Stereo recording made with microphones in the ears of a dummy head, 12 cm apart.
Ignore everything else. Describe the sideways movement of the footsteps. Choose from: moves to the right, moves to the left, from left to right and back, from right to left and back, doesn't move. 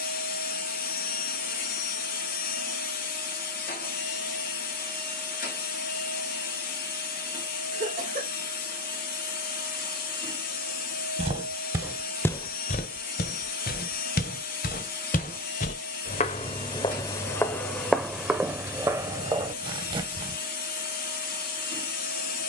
from right to left and back.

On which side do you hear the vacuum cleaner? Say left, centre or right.
left.